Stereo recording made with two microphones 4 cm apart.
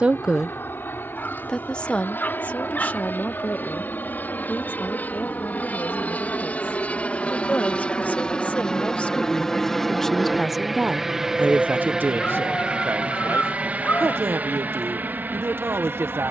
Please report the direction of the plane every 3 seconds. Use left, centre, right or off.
left, left, left, centre, right, right.